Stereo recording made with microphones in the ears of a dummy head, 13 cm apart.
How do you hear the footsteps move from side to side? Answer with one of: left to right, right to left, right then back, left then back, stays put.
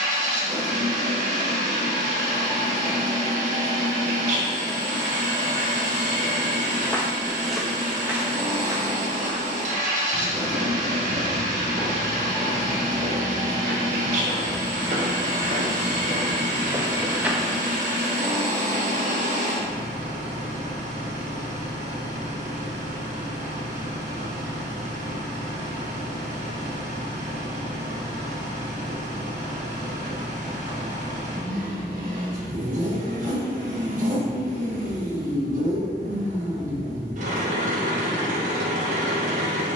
right then back.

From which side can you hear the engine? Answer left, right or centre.
right.